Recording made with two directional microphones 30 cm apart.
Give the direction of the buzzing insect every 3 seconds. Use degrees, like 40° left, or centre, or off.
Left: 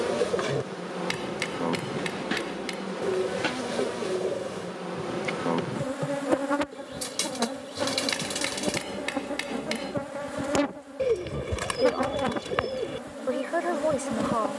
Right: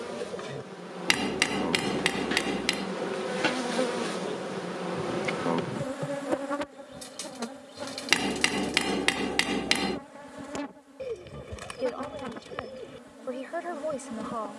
20° left, centre, 40° left, 60° left, 60° left.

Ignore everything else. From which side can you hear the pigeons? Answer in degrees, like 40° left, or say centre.
70° left.